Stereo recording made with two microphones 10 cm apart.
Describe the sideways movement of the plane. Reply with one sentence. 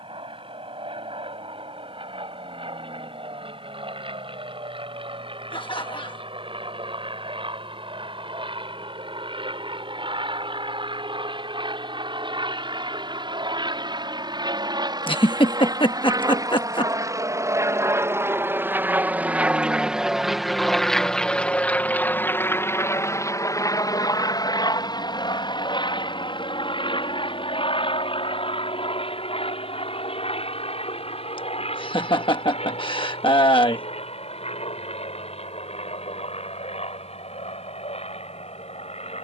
In this clip you hear the plane move from right to left.